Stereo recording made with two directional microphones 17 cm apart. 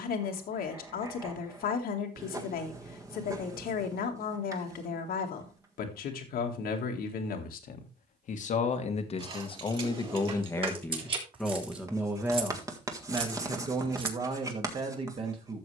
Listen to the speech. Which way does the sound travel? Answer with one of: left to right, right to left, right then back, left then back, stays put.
left to right.